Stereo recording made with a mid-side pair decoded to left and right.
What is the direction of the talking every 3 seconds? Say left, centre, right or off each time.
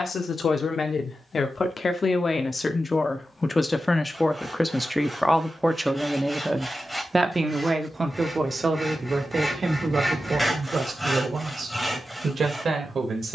left, centre, right, right, right.